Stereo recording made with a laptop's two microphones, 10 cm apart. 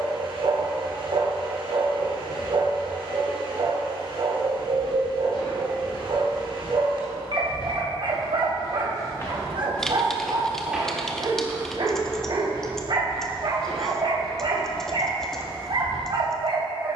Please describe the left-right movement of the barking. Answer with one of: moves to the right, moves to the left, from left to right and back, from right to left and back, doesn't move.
doesn't move.